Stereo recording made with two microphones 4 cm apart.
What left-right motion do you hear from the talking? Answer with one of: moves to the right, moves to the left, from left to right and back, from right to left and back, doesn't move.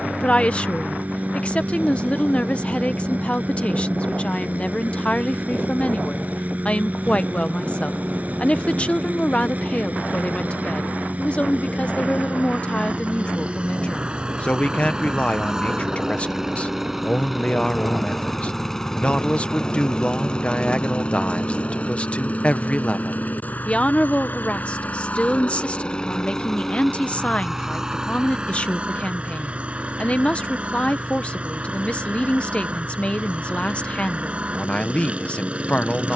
doesn't move.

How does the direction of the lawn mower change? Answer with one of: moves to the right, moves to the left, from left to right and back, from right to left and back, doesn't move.
from right to left and back.